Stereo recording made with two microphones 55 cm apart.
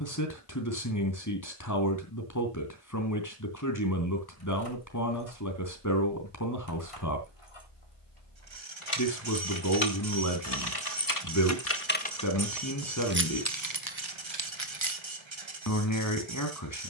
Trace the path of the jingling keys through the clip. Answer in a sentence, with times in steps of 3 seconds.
You can hear the jingling keys not at all from 0 s, on the left from 3 s, on the right from 12 s and not at all from 15 s.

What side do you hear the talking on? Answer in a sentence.
You can hear the talking on the left.